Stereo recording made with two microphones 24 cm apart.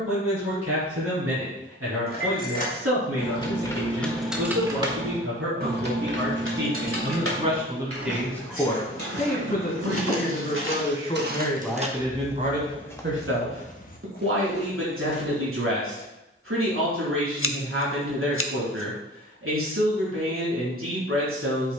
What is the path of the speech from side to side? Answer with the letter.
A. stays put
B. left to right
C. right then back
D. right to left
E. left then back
E.